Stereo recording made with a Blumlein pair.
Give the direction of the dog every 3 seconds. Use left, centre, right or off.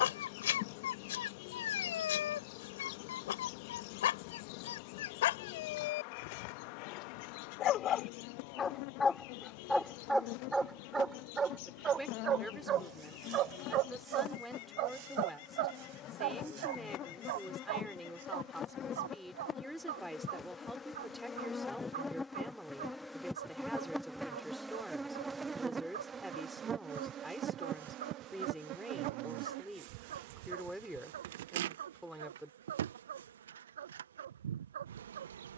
left, left, left, centre, right, right, right, right, right, right, right, right.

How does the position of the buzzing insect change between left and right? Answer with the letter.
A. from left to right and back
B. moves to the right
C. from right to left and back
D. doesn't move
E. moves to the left
B.